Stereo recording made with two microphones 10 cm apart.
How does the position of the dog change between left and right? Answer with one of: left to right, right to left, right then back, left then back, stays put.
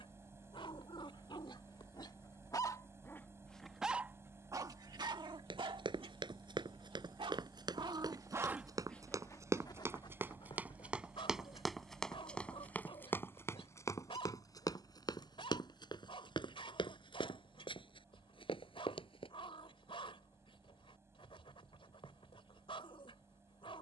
right then back.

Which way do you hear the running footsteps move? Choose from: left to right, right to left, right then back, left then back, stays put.
right to left.